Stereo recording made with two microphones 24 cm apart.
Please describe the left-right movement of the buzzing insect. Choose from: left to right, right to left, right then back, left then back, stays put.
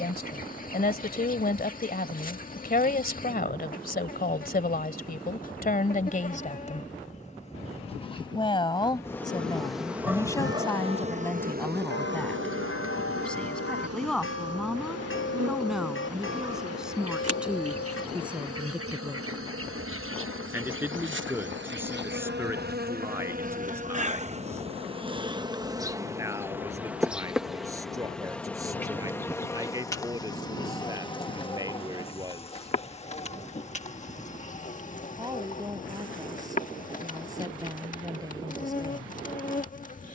right then back.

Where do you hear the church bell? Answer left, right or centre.
left.